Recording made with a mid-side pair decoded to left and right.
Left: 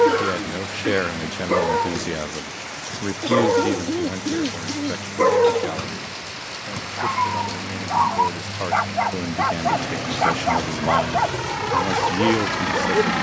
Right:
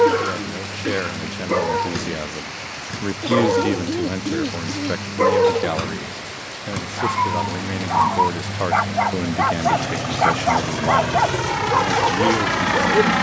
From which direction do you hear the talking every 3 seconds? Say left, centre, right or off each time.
left, right, right, centre, left.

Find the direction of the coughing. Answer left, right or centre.
centre.